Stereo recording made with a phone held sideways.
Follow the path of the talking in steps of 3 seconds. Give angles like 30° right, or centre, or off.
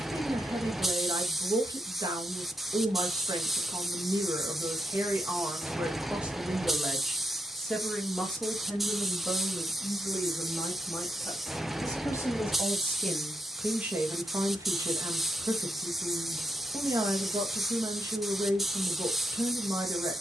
30° right, 20° right, centre, 20° left, centre, 20° right, 20° right.